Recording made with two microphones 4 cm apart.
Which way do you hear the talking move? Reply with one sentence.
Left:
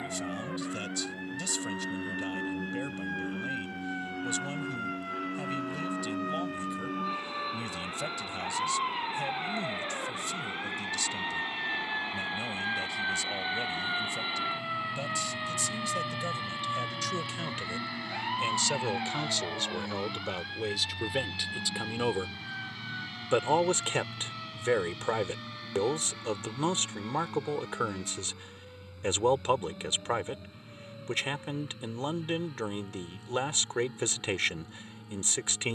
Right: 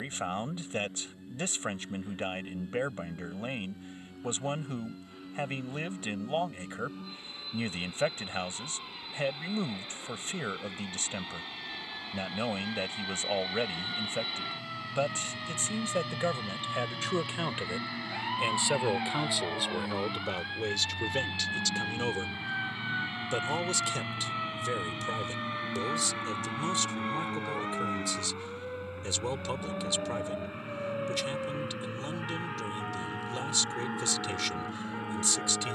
You can hear the talking move to the left.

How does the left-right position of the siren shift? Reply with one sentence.
In this clip you hear the siren go from the left side to the right.